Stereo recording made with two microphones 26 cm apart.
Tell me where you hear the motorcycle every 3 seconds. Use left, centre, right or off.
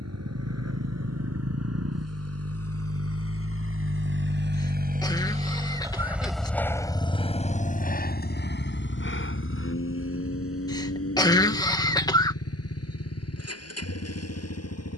right, right, left, left, left.